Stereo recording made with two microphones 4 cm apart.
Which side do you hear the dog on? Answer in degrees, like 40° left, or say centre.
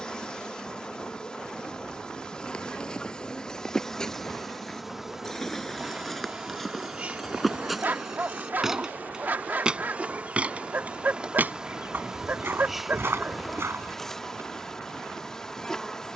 40° right.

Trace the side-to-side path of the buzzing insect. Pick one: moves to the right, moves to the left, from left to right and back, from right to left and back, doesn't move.
from left to right and back.